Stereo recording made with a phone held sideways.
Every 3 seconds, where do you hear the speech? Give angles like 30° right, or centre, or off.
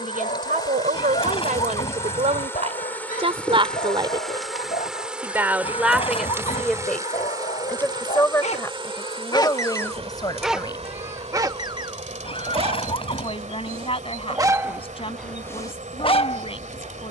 60° right, 20° right, 10° left, 30° left, 40° left, 40° left.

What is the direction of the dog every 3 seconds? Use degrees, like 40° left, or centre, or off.
60° left, 60° left, 60° left, centre, 30° right, 30° left.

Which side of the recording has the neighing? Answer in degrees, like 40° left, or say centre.
40° left.